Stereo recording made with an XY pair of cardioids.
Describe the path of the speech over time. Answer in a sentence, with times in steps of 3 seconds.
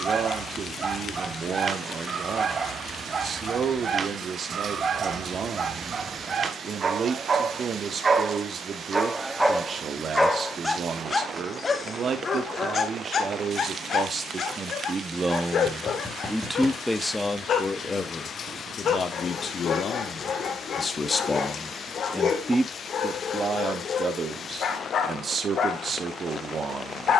In this clip you hear the speech on the right from 0 s, in the centre from 15 s, on the left from 18 s, in the centre from 21 s and on the right from 24 s.